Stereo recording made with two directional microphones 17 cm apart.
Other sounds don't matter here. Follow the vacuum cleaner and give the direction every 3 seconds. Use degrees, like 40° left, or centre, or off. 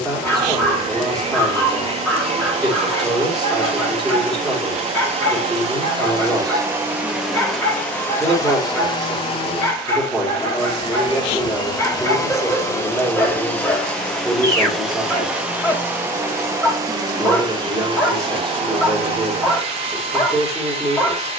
40° right, 40° right, centre, 30° left, 10° left, 20° right, 30° right.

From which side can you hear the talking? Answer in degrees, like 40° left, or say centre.
centre.